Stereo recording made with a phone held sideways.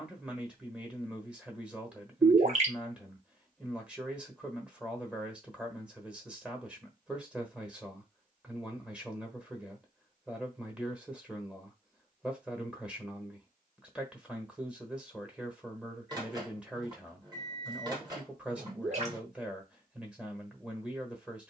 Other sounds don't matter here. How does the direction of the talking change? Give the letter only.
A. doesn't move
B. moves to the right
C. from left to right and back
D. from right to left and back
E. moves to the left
A.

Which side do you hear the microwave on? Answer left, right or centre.
right.